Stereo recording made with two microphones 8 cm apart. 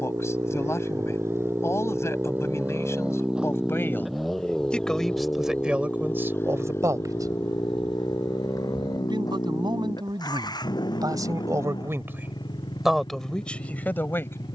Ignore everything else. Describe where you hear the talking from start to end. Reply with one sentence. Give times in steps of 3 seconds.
In this clip you hear the talking on the left from 0 s, in the centre from 3 s, on the right from 6 s and in the centre from 12 s.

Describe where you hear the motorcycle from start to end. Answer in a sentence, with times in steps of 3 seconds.
In this clip you hear the motorcycle on the right from 0 s, in the centre from 3 s and on the left from 6 s.